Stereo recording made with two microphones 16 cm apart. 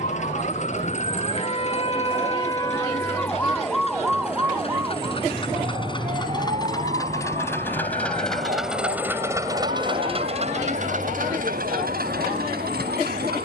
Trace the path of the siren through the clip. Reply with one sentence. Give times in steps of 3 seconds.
In this clip you hear the siren on the left from 0 s, in the centre from 3 s and on the right from 6 s.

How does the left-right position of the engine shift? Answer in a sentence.
You can hear the engine move from left to right.